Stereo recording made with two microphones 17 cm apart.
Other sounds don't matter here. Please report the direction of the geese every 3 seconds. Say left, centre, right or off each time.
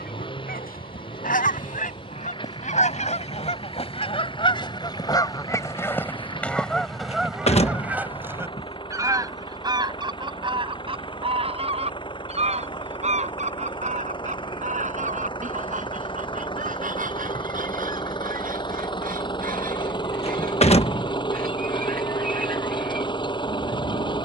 left, left, centre, right, right, right, right, right.